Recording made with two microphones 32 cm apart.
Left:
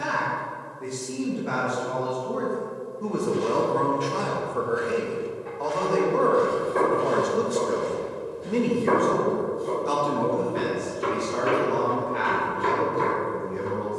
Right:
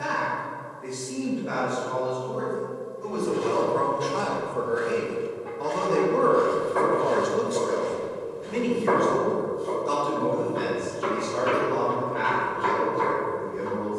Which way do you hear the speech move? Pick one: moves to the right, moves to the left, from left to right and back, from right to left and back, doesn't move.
from left to right and back.